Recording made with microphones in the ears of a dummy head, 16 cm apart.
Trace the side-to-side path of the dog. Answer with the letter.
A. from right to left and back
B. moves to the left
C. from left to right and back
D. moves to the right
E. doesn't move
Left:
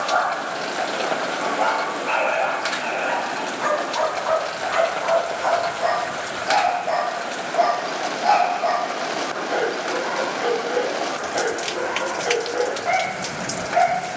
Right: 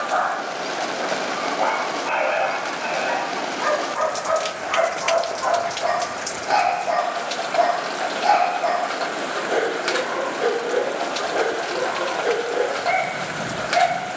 D.